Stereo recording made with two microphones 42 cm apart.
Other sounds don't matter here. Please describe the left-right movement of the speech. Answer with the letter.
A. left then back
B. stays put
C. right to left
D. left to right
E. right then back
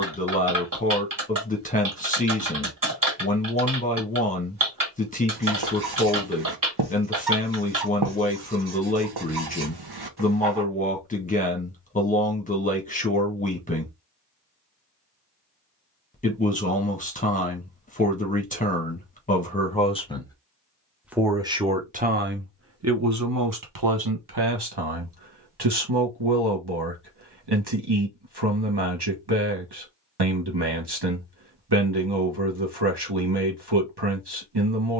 D.